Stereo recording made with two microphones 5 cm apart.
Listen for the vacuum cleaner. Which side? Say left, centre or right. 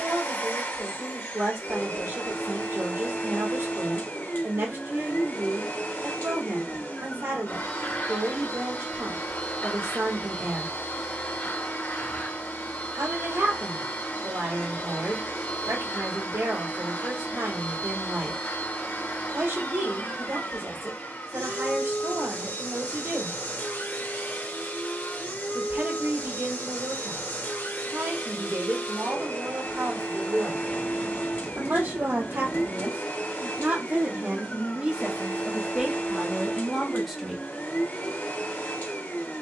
left.